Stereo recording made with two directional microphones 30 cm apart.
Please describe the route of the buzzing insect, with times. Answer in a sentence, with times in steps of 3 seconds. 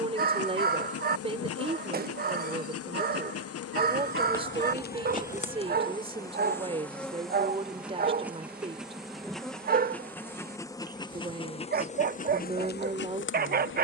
In this clip you hear the buzzing insect on the left from 0 s, in the centre from 6 s and on the left from 12 s.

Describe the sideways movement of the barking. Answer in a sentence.
In this clip you hear the barking stay put.